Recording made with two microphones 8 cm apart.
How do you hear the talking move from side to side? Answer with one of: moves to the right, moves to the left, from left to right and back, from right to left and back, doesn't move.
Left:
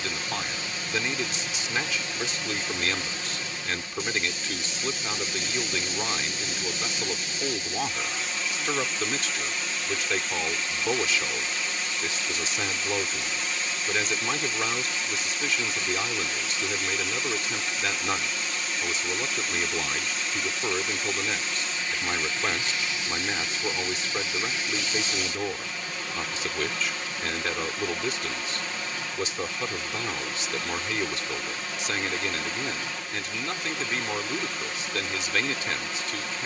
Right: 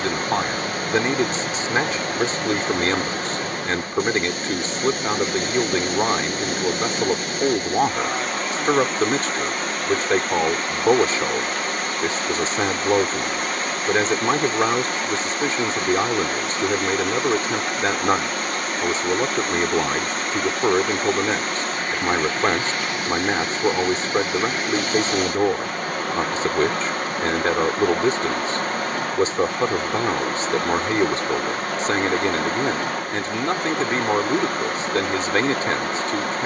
doesn't move.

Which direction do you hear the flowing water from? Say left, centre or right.
right.